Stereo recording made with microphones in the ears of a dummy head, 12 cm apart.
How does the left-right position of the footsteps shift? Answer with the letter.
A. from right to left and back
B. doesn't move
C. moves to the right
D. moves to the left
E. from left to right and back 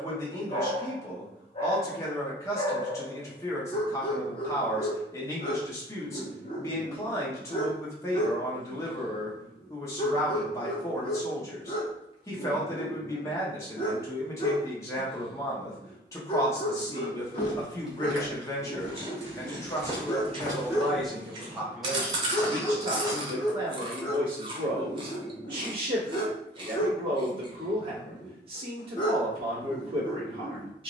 E.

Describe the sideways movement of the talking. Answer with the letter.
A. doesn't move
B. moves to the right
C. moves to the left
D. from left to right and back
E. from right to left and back
B.